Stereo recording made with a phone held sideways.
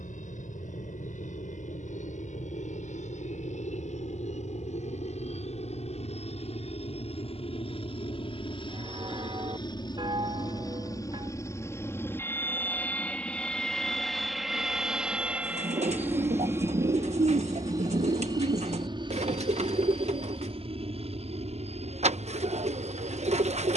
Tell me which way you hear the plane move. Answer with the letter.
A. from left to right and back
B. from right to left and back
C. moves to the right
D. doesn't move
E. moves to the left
C.